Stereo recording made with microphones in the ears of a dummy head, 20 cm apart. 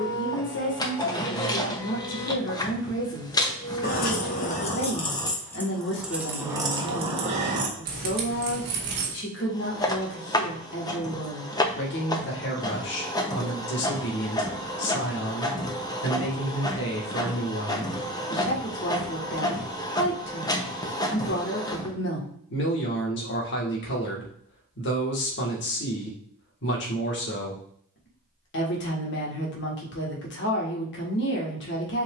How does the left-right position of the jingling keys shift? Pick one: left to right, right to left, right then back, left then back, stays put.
left to right.